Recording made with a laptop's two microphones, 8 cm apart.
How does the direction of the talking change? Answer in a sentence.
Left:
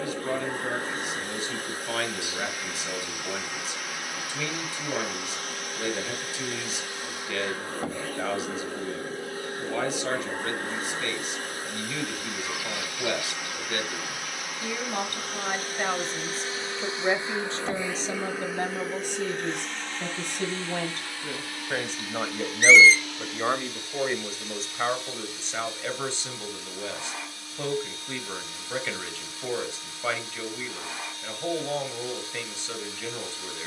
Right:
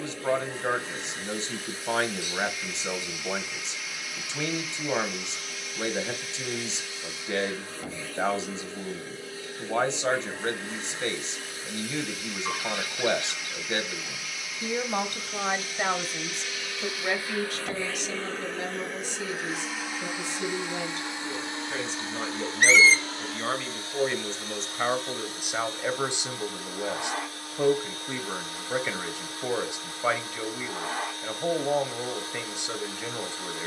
In this clip you hear the talking move from right to left and back again.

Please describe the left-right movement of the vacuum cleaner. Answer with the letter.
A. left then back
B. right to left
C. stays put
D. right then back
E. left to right
E.